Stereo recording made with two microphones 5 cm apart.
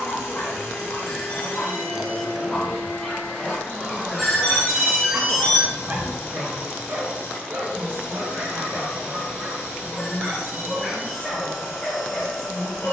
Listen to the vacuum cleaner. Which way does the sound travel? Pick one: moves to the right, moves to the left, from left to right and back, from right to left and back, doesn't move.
doesn't move.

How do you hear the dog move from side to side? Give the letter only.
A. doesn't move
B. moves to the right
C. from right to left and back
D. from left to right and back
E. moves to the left
D.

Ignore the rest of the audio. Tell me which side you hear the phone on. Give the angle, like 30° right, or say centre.
centre.